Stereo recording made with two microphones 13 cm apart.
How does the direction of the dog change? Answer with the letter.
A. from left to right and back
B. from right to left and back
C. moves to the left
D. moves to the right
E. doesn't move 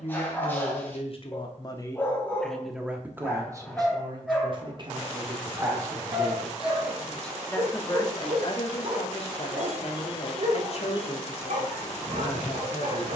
D.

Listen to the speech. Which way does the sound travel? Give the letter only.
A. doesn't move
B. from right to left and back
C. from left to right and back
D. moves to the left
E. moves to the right
C.